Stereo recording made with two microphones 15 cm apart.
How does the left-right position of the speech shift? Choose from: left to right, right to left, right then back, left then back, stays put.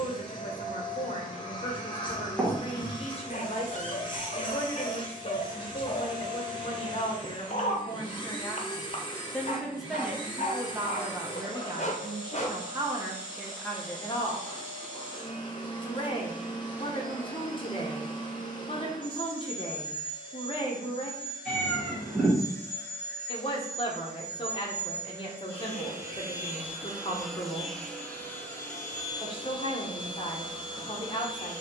right then back.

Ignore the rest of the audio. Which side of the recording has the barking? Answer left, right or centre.
left.